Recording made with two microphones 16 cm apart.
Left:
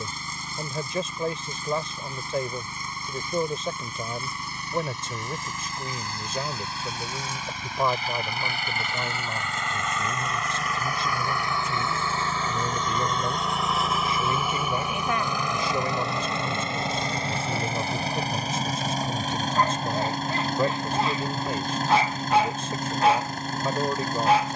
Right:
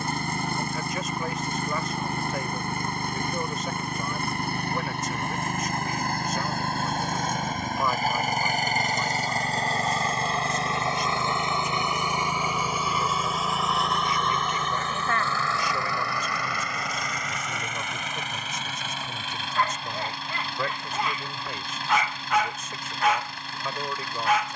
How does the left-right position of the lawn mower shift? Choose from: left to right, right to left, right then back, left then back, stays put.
right to left.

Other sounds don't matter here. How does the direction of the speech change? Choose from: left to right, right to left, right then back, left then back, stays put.
stays put.